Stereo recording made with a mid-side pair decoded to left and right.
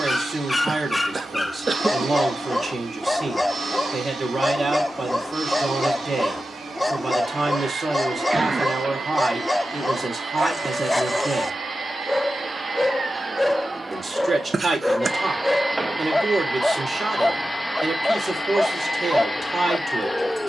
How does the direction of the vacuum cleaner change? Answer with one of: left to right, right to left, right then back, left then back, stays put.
right to left.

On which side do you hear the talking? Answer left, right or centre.
right.